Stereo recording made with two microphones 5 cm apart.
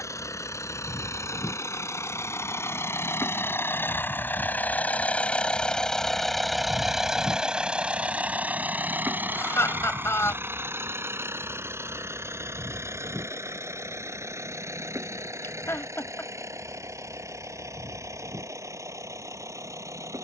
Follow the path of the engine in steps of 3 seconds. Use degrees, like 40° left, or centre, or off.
60° left, 30° left, 10° right, 40° right, 60° right, 60° right, 70° right.